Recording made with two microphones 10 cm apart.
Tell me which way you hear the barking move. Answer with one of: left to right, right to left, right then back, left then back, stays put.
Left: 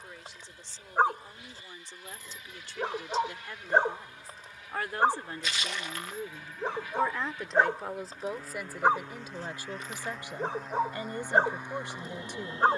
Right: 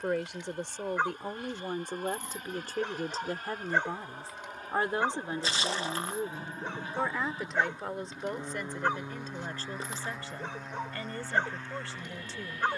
stays put.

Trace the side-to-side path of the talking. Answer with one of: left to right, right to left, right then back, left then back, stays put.
right to left.